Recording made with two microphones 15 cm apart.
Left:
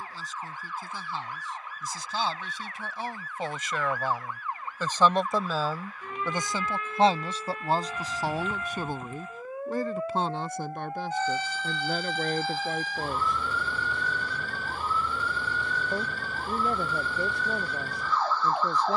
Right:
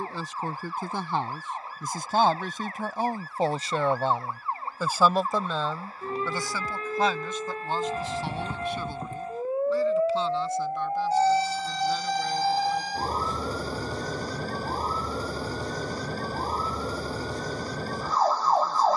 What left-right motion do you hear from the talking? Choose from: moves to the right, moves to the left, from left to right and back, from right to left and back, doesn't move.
moves to the left.